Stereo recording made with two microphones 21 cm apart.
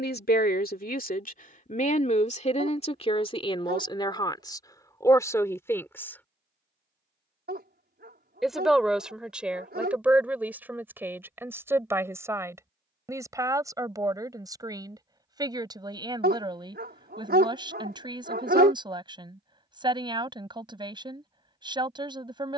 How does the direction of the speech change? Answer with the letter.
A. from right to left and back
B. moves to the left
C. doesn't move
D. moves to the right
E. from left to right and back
D.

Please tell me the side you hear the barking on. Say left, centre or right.
right.